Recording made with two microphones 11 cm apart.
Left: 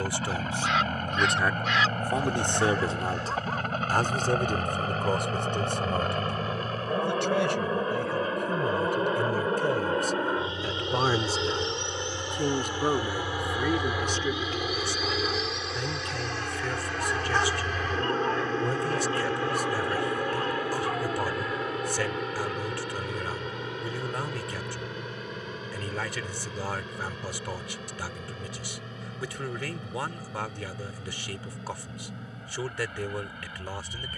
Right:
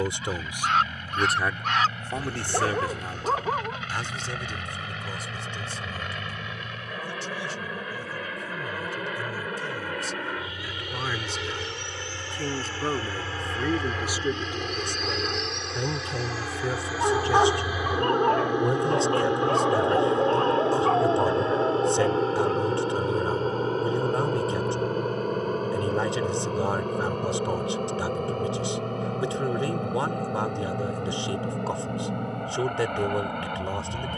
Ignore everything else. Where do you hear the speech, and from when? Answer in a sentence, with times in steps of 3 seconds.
In this clip you hear the speech in the centre from 0 s, on the left from 3 s, in the centre from 12 s and on the right from 15 s.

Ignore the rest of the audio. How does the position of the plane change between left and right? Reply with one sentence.
In this clip you hear the plane travel towards the right.